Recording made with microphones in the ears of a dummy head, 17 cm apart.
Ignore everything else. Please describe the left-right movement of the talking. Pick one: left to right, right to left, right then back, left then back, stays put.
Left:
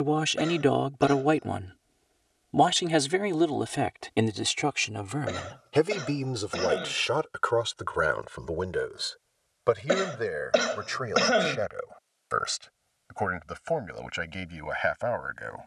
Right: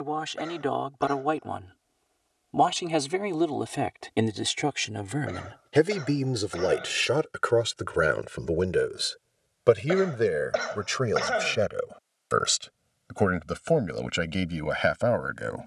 left to right.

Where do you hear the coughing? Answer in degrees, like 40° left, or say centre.
40° left.